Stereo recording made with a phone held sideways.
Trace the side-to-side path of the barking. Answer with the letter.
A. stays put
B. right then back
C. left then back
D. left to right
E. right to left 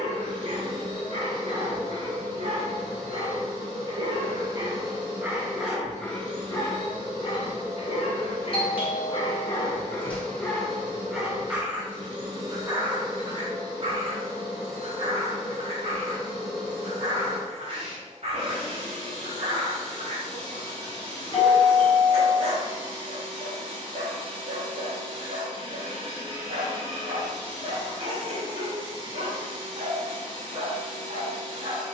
C.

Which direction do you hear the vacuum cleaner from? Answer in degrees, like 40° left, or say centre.
40° right.